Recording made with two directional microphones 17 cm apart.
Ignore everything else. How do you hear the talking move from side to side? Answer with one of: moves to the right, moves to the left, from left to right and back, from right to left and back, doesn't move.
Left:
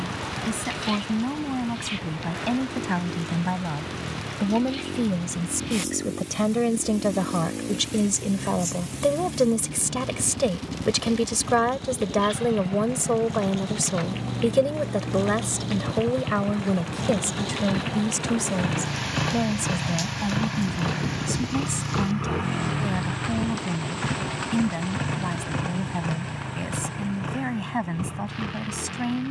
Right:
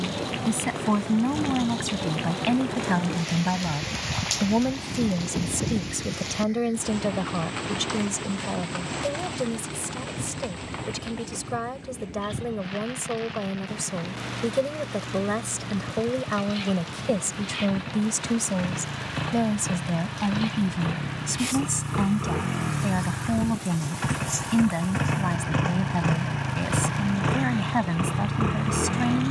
from right to left and back.